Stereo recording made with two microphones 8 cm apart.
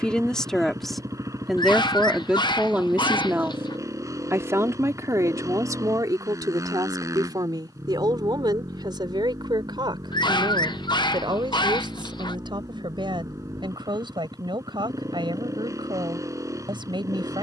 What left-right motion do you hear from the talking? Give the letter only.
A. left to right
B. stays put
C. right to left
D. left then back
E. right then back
A.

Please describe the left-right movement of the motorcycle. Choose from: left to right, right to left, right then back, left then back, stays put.
stays put.